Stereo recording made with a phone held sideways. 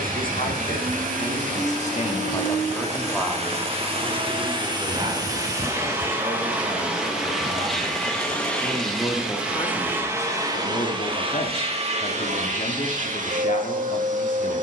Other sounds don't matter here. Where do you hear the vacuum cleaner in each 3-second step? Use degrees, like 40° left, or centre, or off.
60° right, 30° right, centre, 20° right, 50° right.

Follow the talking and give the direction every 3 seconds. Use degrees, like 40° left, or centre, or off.
50° left, 20° right, 30° right, 40° left, 60° left.